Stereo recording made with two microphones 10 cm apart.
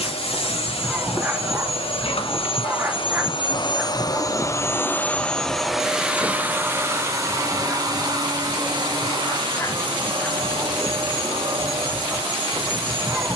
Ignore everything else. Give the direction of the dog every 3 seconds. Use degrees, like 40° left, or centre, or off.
20° right, 10° right, 20° left, 10° left, 10° right.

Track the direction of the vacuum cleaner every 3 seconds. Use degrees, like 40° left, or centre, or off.
70° left, 30° left, 30° right, 50° right, 60° right.